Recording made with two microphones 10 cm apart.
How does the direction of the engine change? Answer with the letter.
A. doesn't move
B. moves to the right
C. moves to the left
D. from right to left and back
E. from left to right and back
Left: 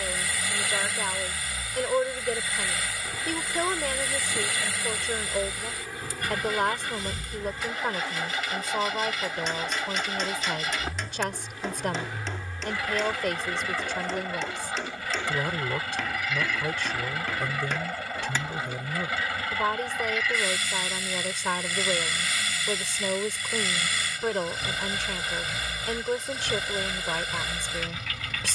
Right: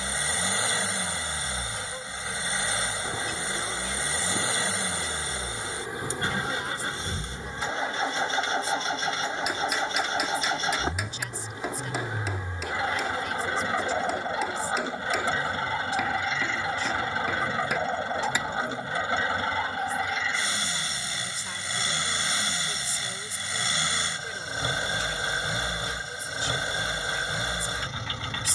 A.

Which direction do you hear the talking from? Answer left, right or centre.
left.